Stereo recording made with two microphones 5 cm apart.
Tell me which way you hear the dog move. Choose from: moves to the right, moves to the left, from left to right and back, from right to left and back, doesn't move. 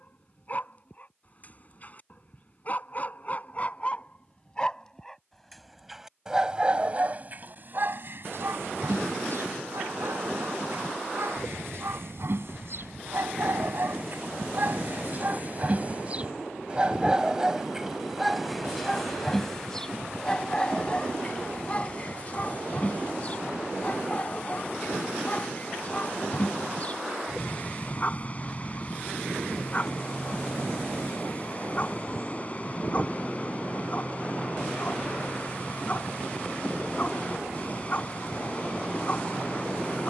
from left to right and back.